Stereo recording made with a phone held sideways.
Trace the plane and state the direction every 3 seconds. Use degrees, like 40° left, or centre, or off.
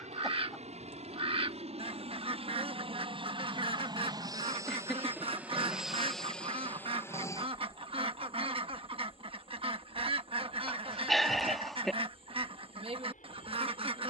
60° right, 30° right, 20° left, 50° left, 60° left.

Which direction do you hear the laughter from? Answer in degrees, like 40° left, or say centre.
centre.